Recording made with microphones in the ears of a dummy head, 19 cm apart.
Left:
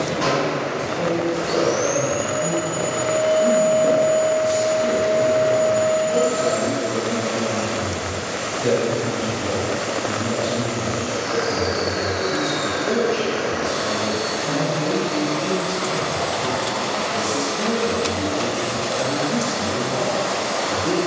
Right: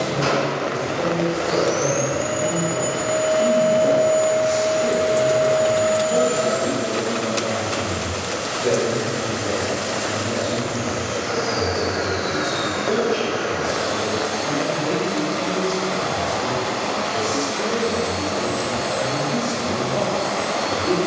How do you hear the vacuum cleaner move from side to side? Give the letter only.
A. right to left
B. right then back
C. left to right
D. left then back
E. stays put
E.